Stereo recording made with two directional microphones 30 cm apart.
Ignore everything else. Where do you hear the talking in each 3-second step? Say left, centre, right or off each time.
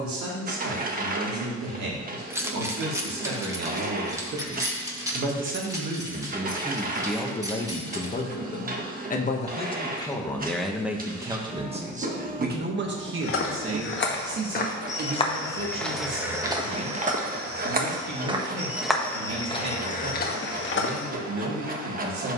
right, right, centre, centre, right, right, right, right.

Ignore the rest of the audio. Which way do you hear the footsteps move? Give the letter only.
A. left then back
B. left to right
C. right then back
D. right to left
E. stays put
C.